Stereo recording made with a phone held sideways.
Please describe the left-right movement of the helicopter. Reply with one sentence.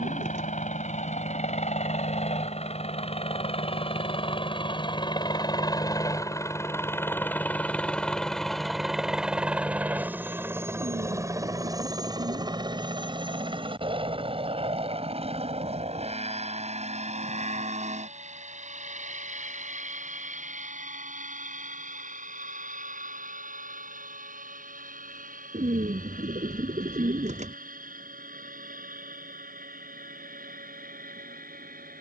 In this clip you hear the helicopter go from the left side to the right.